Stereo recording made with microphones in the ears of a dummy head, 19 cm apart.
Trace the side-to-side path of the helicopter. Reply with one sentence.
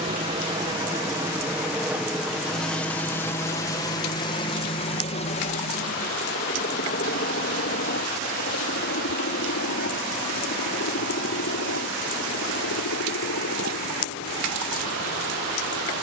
In this clip you hear the helicopter move to the left.